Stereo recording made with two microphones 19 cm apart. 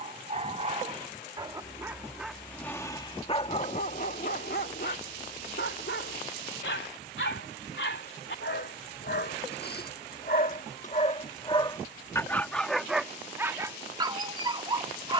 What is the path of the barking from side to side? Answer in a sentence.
You can hear the barking go left and come back.